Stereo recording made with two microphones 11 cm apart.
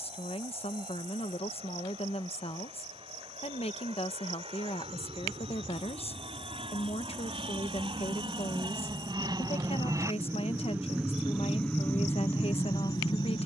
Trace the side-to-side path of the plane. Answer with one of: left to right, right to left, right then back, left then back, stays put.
right to left.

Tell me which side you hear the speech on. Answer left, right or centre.
left.